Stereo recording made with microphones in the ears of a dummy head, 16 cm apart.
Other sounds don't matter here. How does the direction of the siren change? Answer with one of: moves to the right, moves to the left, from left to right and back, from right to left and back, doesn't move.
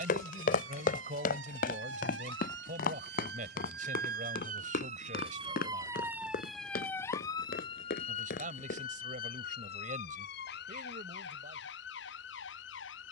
moves to the left.